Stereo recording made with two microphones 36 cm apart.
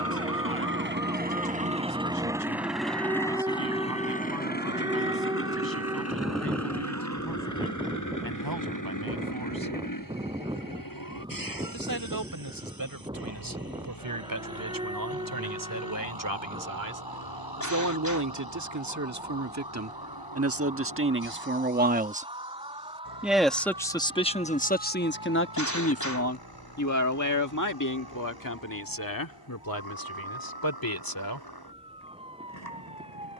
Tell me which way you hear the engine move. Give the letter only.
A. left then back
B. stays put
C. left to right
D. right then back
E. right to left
E.